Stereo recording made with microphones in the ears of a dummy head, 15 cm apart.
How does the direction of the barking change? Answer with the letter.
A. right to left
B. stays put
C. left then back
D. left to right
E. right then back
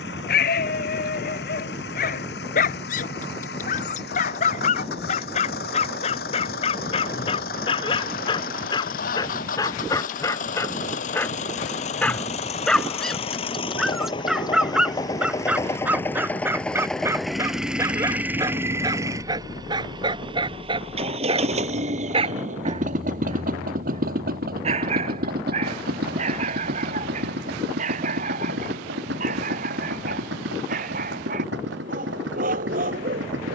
D.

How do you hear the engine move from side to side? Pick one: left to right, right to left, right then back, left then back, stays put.
left to right.